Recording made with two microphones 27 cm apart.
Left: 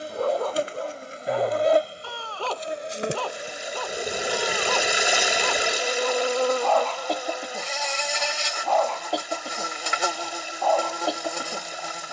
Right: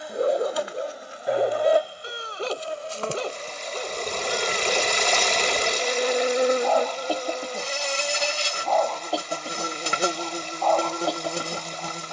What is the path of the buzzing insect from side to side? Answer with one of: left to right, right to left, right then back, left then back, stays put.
left to right.